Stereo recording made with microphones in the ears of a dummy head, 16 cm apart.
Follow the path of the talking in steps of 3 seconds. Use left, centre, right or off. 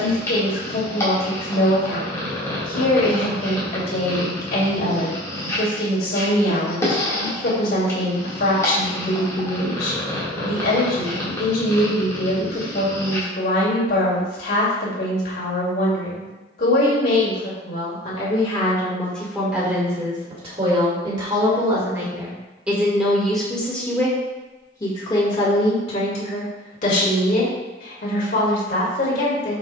left, left, left, left, left, left, centre, centre, left, left.